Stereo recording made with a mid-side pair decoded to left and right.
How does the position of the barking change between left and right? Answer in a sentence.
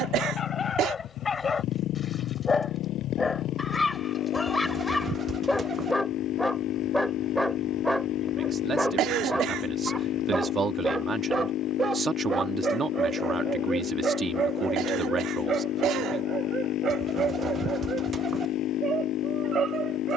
You can hear the barking move from left to right.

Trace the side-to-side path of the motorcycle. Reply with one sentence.
You can hear the motorcycle stay put.